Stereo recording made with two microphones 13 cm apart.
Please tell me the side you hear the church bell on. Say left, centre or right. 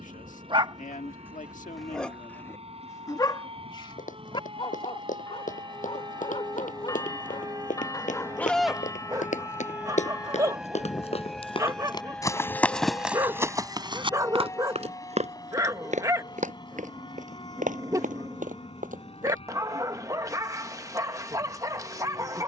left.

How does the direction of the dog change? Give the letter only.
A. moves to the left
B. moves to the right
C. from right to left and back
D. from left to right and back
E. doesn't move
C.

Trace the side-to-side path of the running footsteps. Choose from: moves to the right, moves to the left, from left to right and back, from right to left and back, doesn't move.
moves to the right.